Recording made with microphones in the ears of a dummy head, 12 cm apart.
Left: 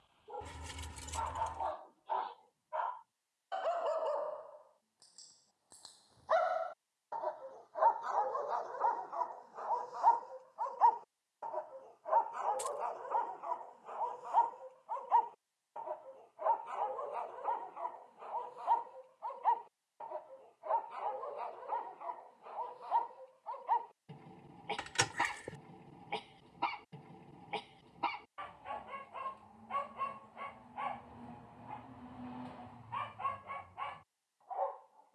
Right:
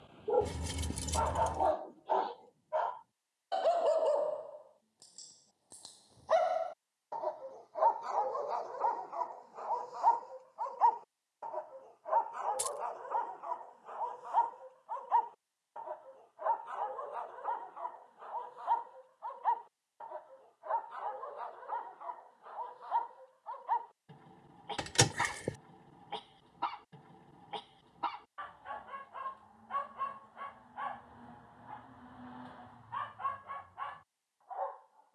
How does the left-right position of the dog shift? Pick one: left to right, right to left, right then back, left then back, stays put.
right to left.